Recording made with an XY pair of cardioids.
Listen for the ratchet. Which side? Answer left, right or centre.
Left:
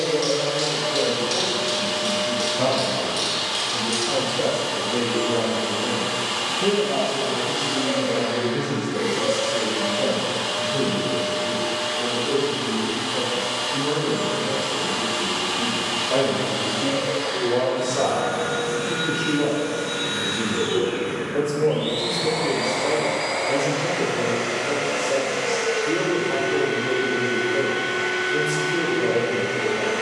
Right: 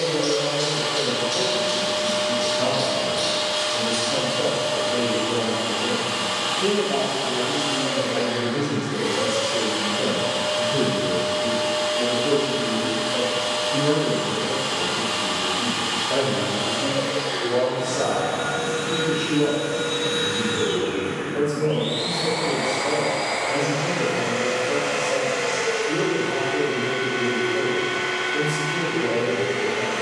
left.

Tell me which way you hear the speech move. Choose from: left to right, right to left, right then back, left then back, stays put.
right then back.